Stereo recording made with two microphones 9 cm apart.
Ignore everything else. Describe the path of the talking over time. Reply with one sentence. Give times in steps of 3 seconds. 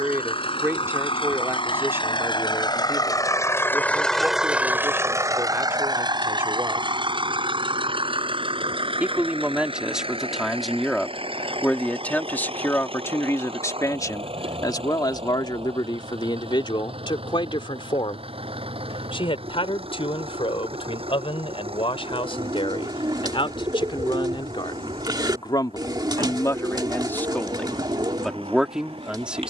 You can hear the talking on the right from 0 s, in the centre from 9 s, on the left from 12 s and in the centre from 27 s.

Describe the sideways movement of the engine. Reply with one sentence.
In this clip you hear the engine go from the left side to the right.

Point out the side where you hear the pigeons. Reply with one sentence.
In this clip you hear the pigeons on the right.